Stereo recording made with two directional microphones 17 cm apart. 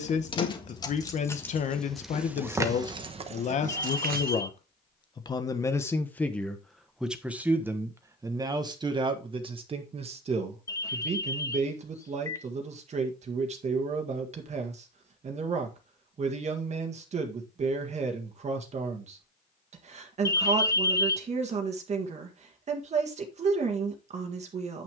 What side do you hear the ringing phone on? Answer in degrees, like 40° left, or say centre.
20° left.